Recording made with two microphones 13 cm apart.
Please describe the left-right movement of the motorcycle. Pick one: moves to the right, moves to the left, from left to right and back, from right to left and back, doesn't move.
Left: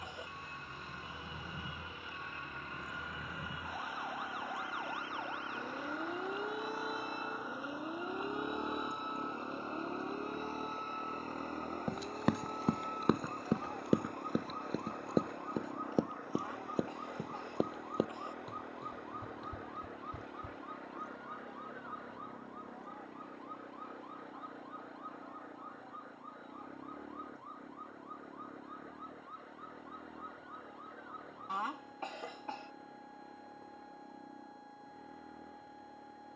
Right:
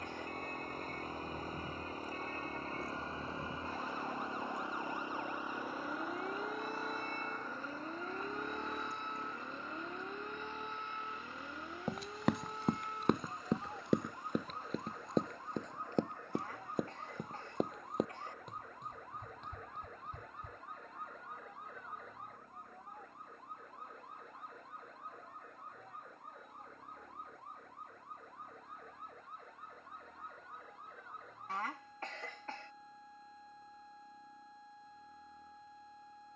moves to the left.